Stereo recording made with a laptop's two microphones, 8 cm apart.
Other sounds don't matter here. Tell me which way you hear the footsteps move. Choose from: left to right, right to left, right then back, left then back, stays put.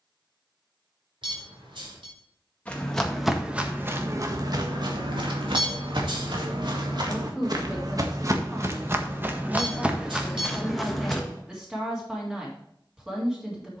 right then back.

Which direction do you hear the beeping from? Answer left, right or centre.
right.